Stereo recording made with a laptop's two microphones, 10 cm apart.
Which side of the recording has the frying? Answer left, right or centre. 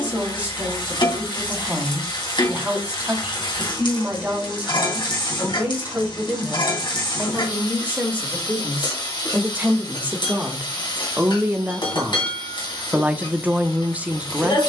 left.